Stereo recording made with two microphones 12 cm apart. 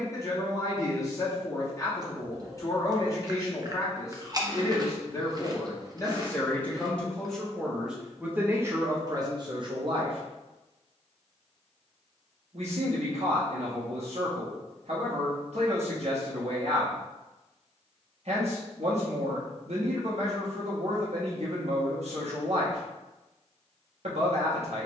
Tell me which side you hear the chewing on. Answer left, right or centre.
right.